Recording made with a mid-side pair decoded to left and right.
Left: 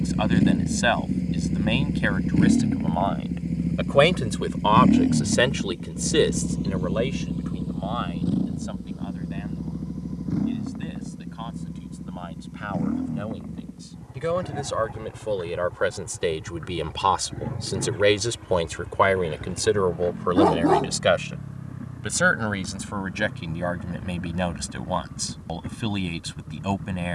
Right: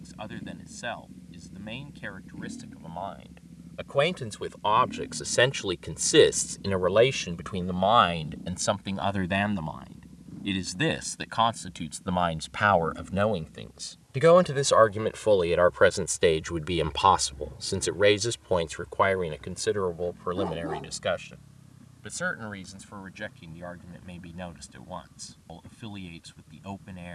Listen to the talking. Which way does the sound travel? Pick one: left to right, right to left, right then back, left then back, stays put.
right then back.